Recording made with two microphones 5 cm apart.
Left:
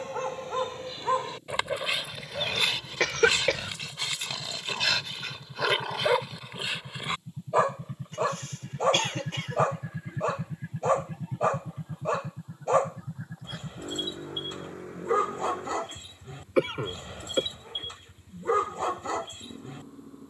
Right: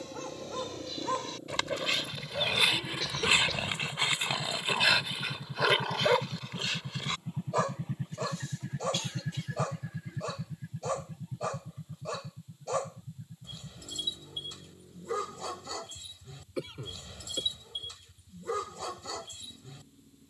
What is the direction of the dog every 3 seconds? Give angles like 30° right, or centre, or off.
20° left, 20° right, 20° left, 40° left, 40° left, 40° left, 40° left.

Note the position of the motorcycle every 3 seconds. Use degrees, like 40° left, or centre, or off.
70° right, 60° right, 40° right, 30° left, 70° left, 80° left, 80° left.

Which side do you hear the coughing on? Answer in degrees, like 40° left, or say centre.
60° left.